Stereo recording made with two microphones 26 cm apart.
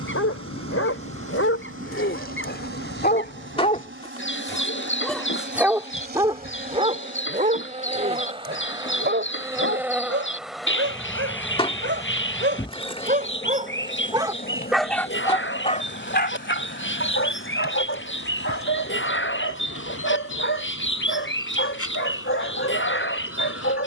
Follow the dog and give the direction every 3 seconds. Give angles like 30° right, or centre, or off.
60° left, 10° left, 30° right, 50° right, 20° right, 40° left, 50° left, 50° left.